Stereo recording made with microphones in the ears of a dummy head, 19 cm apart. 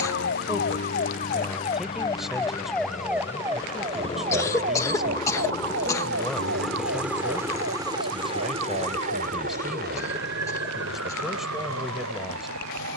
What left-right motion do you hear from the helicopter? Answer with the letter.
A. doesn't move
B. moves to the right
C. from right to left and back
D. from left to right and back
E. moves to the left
B.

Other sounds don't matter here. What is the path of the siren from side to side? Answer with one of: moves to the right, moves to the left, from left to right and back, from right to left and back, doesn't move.
moves to the right.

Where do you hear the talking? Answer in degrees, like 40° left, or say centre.
centre.